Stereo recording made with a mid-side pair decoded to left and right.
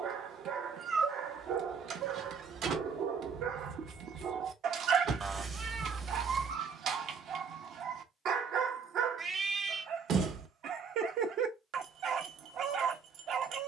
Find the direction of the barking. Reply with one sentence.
You can hear the barking on the right.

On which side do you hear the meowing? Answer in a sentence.
You can hear the meowing on the right.